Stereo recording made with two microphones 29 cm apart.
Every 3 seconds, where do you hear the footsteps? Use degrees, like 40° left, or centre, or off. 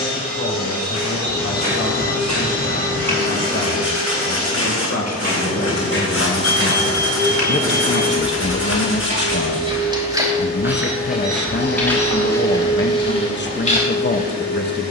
70° right, 60° right, 40° right, 10° right, 20° left.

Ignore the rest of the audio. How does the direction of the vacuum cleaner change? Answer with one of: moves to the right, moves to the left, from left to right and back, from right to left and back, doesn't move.
doesn't move.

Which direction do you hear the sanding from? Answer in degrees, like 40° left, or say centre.
60° left.